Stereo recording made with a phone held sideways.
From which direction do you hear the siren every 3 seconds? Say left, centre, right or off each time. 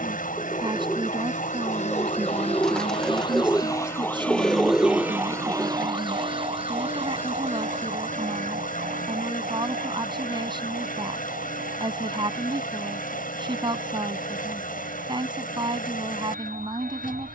left, centre, right, right, right, right.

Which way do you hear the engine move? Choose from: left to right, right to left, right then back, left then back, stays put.
stays put.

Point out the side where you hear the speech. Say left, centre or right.
right.